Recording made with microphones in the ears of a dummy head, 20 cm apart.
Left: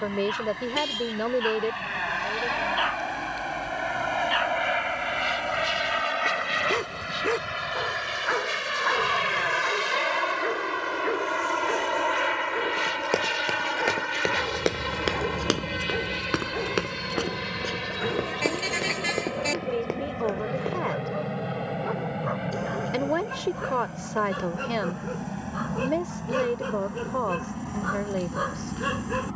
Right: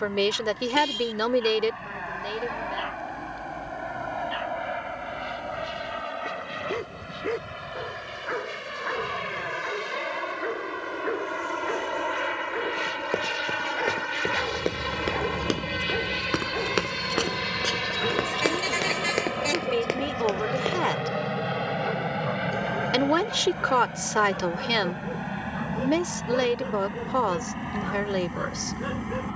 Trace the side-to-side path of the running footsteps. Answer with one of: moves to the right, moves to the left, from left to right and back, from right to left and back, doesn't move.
moves to the right.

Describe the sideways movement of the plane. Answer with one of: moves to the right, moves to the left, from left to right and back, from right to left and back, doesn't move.
moves to the right.